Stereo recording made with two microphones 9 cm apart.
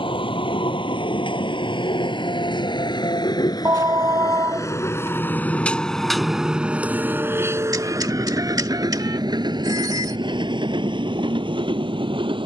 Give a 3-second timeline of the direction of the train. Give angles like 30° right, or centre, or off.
70° left, 30° left, 30° right, 60° right.